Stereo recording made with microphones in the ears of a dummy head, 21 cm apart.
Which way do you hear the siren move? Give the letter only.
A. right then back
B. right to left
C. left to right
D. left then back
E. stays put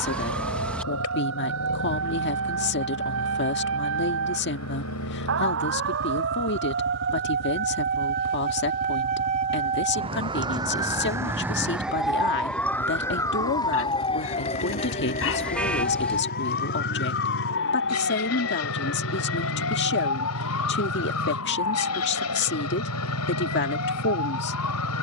B.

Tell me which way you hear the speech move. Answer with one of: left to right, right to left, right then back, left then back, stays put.
stays put.